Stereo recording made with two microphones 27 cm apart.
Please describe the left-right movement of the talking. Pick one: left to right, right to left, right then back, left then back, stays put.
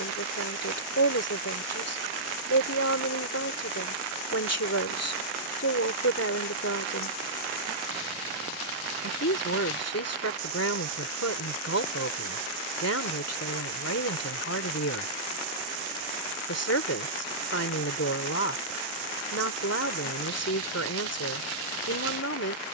stays put.